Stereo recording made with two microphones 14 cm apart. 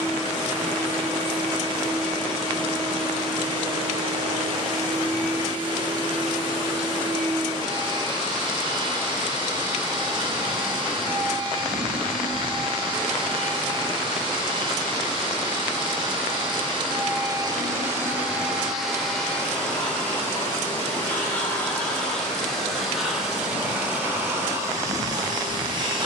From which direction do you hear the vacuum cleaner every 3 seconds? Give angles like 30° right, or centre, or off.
40° right, 40° right, 40° right, 40° right, 40° right, 30° right, 10° left, centre, 30° right.